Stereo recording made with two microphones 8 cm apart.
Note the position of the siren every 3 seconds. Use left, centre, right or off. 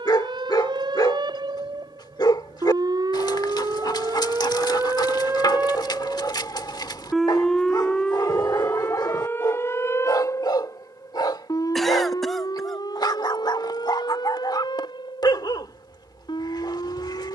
right, right, centre, left, left, left.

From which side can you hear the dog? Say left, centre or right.
left.